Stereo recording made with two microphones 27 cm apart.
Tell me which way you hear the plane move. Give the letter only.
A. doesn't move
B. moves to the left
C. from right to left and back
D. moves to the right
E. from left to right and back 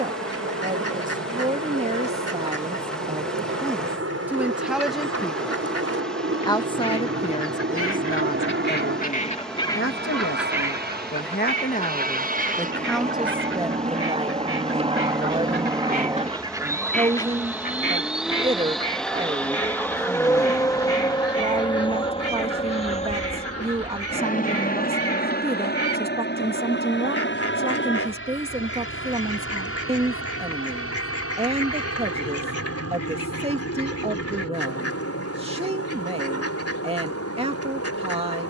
B.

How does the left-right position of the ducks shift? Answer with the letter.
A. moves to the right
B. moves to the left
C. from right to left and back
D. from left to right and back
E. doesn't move
D.